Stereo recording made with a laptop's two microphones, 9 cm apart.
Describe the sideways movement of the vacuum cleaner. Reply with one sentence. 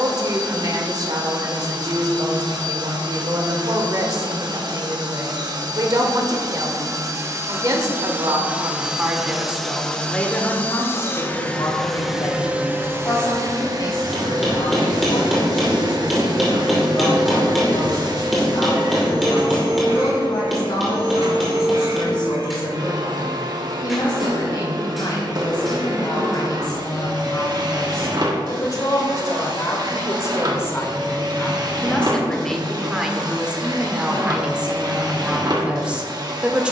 You can hear the vacuum cleaner move from right to left and back again.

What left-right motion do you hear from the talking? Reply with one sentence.
In this clip you hear the talking go left and come back.